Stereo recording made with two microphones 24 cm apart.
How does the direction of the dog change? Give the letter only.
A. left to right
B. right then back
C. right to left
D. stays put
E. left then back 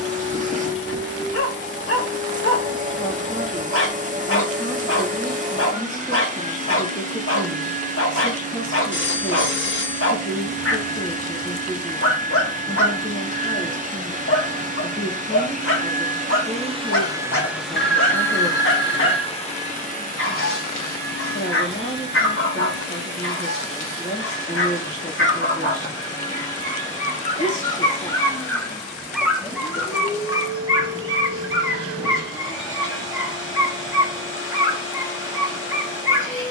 A.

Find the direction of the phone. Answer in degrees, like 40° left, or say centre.
50° left.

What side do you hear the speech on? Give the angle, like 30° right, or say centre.
30° left.